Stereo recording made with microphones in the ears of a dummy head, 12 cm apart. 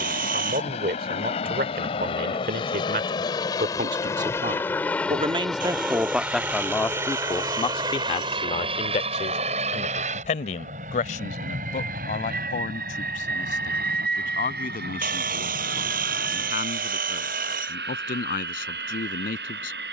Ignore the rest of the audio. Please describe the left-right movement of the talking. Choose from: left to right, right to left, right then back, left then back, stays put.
right to left.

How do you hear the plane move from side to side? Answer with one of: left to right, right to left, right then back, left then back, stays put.
left to right.